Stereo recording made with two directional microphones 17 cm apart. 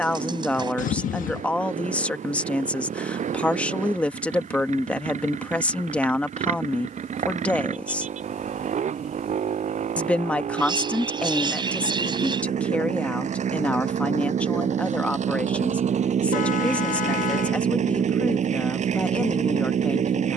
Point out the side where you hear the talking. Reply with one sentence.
In this clip you hear the talking in the centre.